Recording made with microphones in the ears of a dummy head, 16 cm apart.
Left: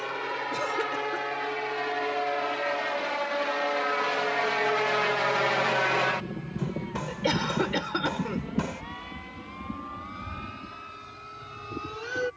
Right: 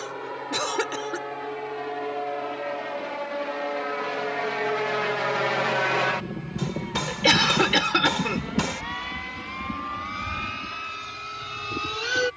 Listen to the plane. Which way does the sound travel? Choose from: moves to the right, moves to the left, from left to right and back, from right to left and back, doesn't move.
moves to the right.